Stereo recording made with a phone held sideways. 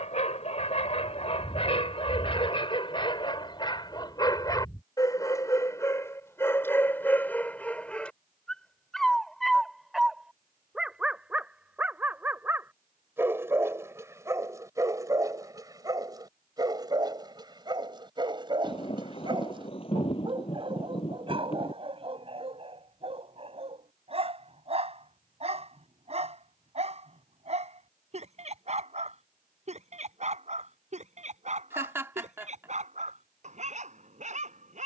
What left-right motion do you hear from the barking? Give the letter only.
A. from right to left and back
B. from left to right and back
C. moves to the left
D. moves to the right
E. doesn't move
D.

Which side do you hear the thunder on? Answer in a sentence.
In this clip you hear the thunder on the left.